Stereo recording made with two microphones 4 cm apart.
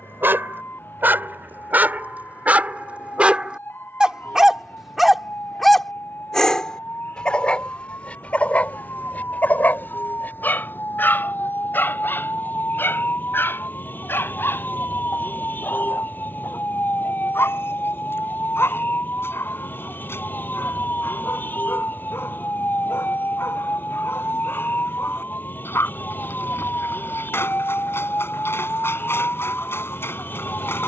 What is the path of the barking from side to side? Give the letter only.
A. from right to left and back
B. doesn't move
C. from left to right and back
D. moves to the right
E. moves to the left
E.